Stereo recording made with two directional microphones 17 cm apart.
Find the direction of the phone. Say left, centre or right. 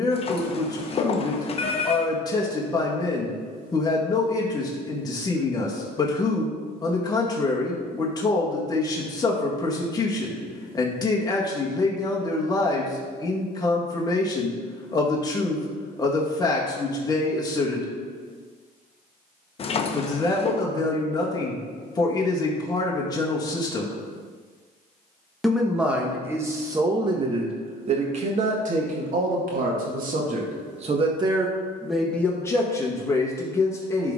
left.